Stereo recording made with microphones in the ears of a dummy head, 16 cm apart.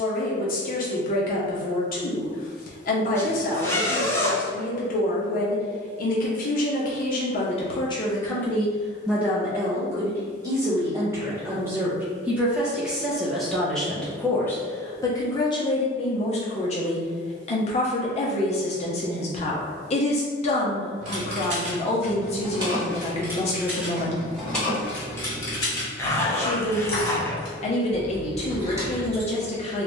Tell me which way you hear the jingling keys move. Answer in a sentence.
You can hear the jingling keys go left and come back.